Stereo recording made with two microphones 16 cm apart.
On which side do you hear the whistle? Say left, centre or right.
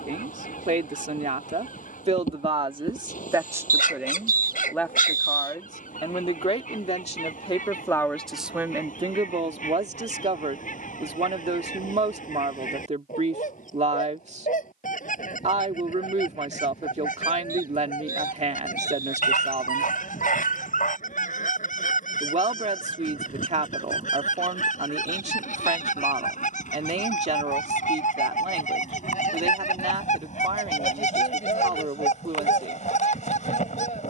right.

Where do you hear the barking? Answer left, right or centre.
left.